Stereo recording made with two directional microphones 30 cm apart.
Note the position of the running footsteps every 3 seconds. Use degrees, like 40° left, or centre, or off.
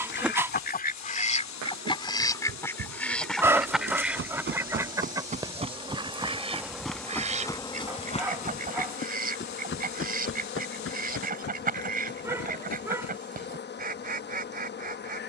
60° right, 30° right, 10° left, 40° left, 50° left.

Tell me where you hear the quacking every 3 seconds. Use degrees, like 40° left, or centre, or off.
20° left, 10° right, 20° right, 30° right, 30° right.